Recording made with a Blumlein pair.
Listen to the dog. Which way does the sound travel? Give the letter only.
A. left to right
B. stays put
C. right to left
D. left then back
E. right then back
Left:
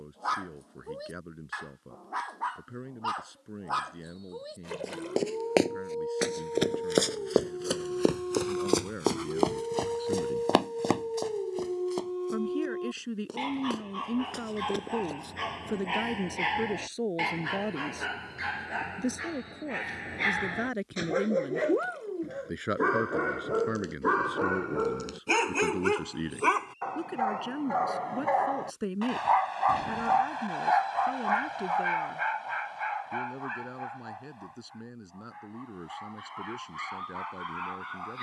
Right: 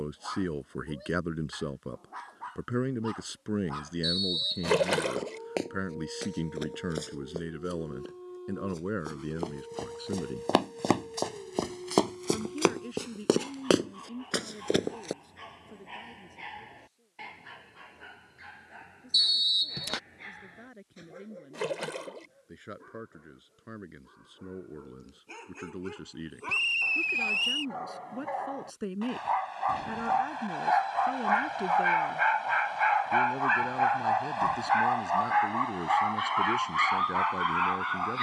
A.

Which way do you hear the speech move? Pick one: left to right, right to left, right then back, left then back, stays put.
left then back.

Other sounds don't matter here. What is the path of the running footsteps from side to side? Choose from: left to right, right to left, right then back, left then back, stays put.
left to right.